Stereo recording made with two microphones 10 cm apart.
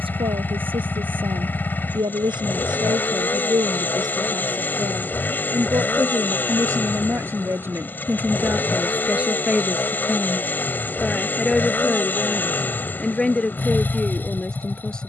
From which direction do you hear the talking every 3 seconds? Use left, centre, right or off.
right, right, right, centre, centre.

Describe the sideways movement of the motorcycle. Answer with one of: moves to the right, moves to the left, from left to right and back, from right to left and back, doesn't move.
doesn't move.